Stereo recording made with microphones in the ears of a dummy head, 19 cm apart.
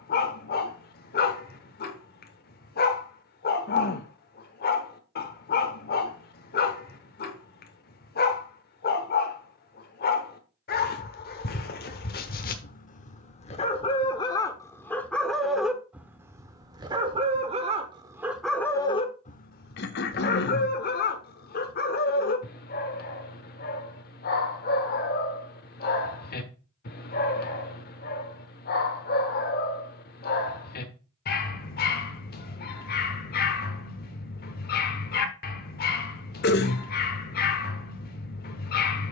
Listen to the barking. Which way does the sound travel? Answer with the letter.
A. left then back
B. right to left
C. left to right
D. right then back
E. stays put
D.